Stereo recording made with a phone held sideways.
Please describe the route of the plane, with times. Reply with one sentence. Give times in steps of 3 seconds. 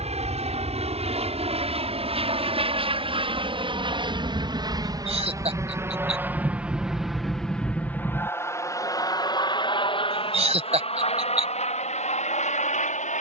In this clip you hear the plane on the right from 0 s, in the centre from 6 s and on the left from 9 s.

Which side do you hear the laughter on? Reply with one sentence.
You can hear the laughter on the right.